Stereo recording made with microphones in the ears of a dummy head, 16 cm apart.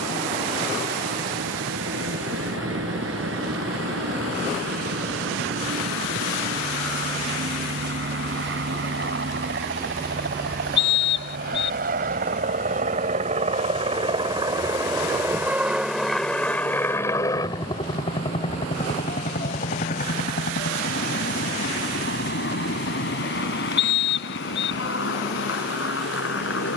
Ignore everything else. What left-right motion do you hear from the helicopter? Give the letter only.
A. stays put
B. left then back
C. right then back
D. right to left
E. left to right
D.